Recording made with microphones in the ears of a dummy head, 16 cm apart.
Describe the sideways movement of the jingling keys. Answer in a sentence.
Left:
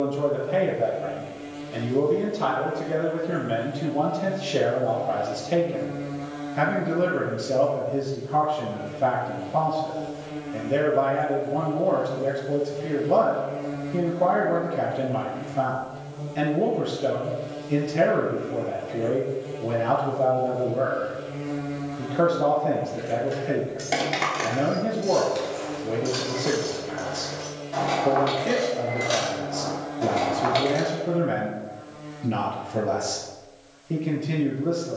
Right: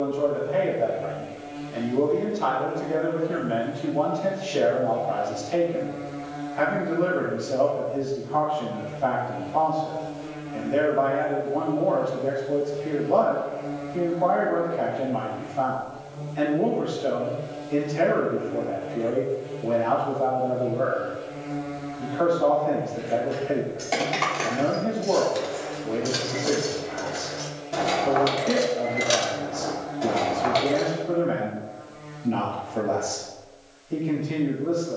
You can hear the jingling keys go right and come back.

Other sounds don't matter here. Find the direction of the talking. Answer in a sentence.
You can hear the talking on the left.